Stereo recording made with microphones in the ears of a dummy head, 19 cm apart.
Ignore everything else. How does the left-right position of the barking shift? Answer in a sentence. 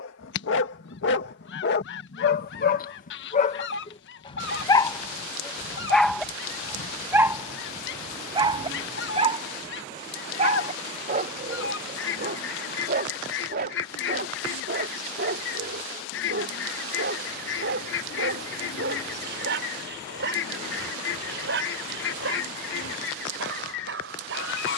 You can hear the barking travel towards the right.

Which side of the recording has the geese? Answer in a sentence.
You can hear the geese on the left.